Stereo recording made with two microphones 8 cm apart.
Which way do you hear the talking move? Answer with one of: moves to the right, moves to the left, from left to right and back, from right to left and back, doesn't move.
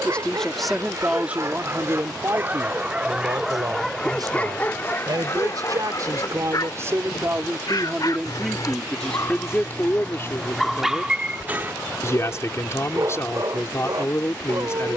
from left to right and back.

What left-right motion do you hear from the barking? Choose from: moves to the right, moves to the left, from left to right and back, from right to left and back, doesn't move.
from right to left and back.